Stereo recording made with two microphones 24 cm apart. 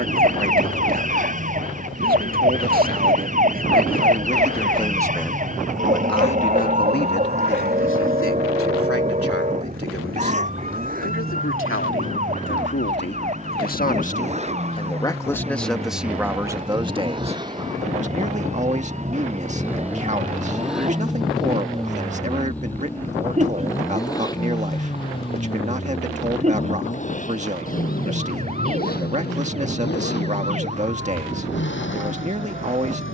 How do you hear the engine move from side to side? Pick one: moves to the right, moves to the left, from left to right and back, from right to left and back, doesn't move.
moves to the left.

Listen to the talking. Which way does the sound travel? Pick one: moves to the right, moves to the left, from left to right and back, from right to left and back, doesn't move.
from right to left and back.